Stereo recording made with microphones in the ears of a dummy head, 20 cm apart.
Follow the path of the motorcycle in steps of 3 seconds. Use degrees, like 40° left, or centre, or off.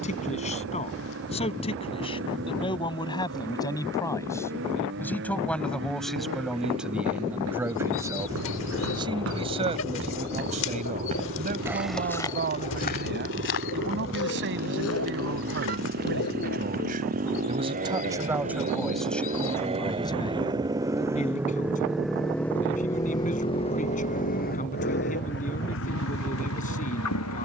60° right, 60° right, 60° right, 50° right, 50° right, 40° right, 30° right, 10° left, 50° left.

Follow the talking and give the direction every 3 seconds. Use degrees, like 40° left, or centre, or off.
30° left, 10° left, 10° right, 30° right, 50° right, 50° right, 10° left, 40° left, 40° left.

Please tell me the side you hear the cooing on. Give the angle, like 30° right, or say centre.
60° left.